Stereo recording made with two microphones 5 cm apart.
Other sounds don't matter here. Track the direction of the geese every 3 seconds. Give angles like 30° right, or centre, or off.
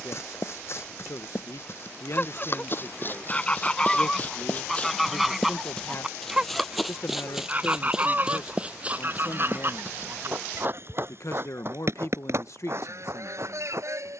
30° left, 10° left, 30° right, 50° right, 60° right.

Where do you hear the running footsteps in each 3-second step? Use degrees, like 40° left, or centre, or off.
50° left, 30° left, 10° right, 40° right, 50° right.